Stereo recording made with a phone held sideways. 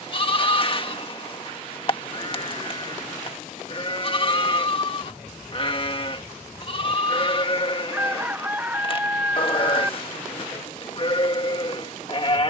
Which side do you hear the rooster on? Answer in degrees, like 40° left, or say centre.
10° right.